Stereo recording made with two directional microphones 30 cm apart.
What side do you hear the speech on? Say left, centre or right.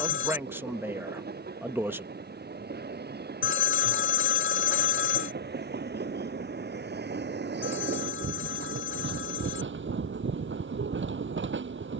centre.